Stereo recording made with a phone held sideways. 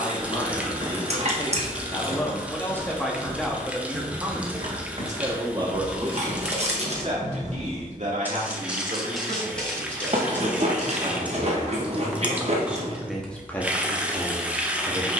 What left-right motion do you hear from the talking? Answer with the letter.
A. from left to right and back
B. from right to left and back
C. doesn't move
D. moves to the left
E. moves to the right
A.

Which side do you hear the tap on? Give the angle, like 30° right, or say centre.
10° right.